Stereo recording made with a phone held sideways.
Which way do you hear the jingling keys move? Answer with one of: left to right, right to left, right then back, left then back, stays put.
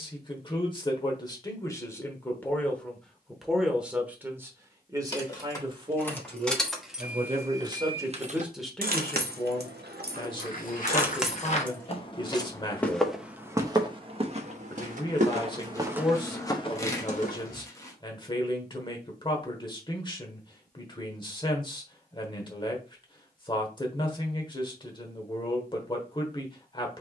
right then back.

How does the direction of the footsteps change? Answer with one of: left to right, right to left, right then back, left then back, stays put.
right then back.